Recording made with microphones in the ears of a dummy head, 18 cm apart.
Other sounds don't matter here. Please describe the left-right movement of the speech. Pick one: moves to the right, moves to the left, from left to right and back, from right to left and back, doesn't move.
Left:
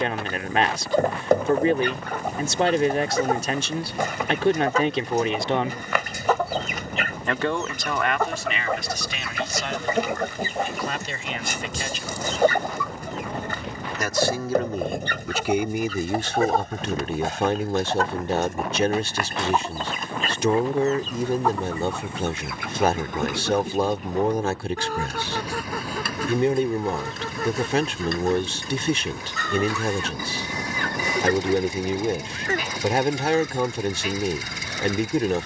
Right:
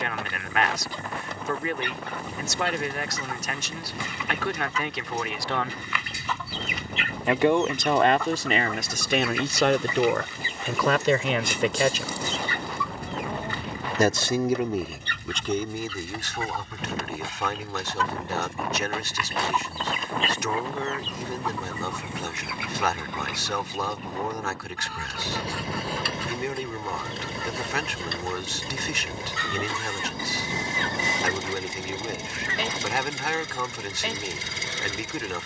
from left to right and back.